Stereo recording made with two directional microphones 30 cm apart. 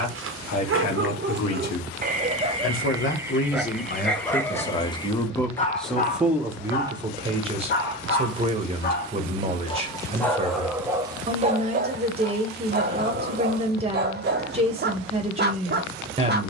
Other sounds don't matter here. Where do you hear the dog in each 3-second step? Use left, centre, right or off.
right, centre, left, centre, right, right.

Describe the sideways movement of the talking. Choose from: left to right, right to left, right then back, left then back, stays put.
left to right.